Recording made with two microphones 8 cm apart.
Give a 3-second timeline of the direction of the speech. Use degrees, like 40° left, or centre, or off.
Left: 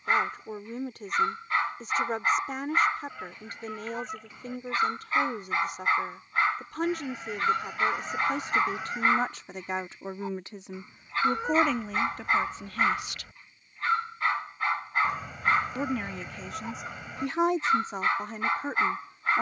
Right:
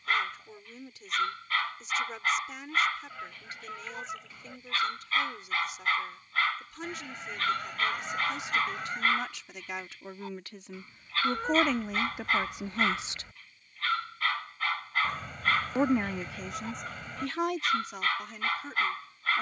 50° left, 50° left, 50° left, 20° left, 20° right, 10° left, 40° left.